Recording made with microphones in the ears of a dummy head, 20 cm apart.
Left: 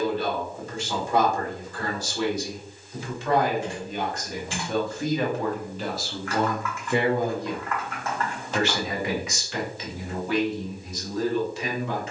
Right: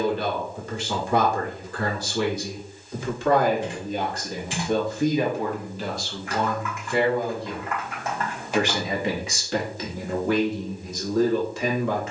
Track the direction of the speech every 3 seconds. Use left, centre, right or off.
right, right, centre, right.